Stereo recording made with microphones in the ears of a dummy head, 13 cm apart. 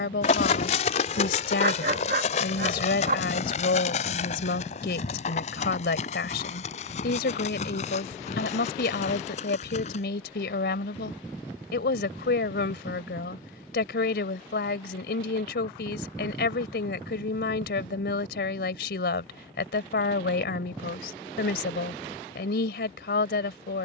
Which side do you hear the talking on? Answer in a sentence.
You can hear the talking on the left.